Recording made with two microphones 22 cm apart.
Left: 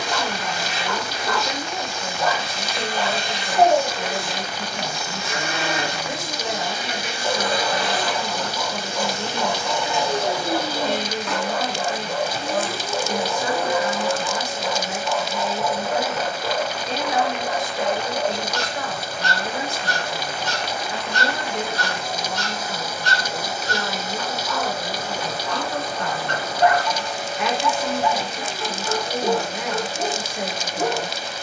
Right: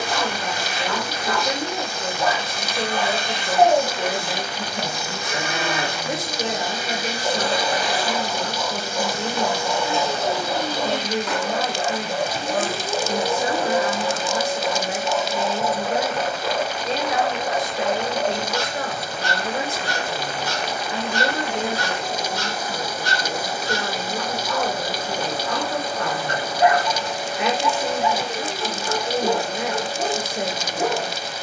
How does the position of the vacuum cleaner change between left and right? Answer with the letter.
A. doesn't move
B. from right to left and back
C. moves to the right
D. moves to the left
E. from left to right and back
B.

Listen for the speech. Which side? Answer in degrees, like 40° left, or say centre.
30° right.